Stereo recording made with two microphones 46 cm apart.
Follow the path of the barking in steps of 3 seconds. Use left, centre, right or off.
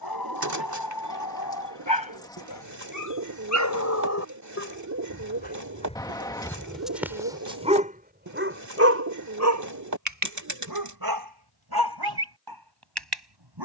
left, left, centre, right, right.